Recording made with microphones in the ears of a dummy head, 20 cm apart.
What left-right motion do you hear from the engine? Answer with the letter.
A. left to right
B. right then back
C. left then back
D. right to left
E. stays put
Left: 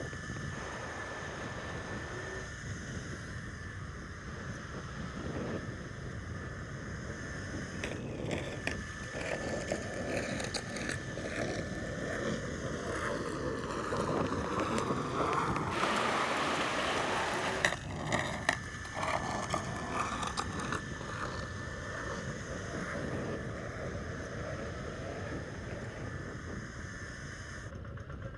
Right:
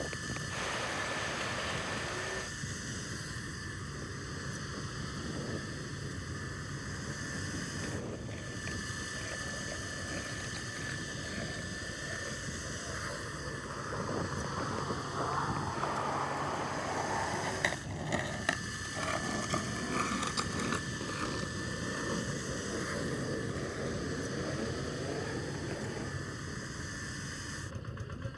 E.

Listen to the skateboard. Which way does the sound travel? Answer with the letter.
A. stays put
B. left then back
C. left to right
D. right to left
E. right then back
C.